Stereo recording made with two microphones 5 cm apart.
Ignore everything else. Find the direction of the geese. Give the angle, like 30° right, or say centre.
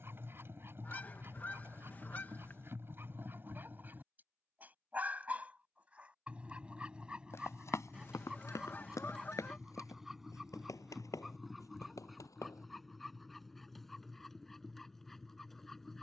30° left.